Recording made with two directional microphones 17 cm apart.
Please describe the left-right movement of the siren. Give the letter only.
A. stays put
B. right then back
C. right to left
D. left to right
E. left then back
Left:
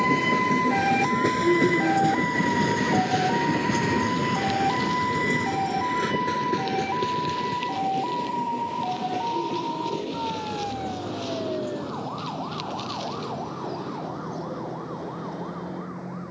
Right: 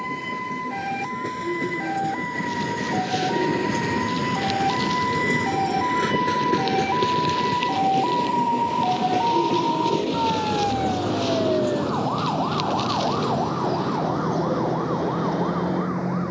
D.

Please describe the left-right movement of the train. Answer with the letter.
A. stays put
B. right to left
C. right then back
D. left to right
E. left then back
D.